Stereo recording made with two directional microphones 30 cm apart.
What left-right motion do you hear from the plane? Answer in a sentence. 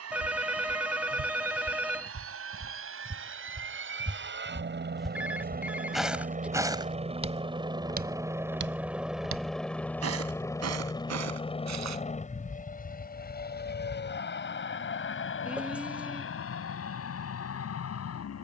You can hear the plane go from the right side to the left.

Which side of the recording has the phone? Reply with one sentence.
In this clip you hear the phone in the centre.